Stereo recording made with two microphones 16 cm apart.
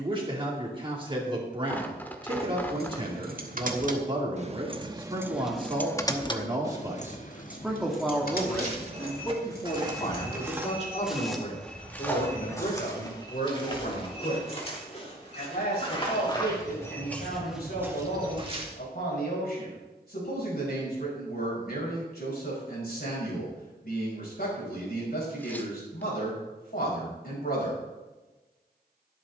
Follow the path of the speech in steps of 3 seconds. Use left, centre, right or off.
right, right, centre, left, left, left, left, left, left, left.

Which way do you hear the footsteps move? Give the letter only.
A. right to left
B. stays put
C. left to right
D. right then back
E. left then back
E.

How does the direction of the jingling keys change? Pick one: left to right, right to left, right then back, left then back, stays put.
right to left.